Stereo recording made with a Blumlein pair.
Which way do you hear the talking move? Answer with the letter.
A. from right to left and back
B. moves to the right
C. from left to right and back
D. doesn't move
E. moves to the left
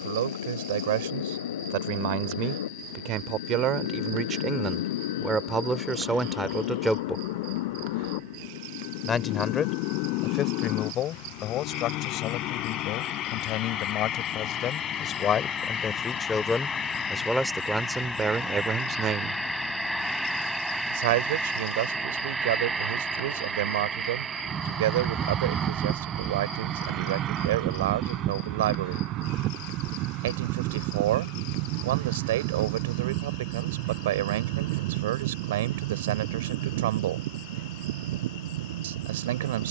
A.